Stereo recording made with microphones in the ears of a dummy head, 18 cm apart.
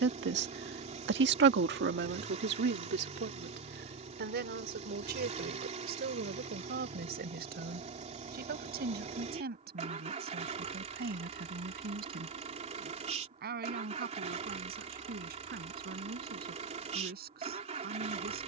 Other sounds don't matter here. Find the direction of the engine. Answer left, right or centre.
right.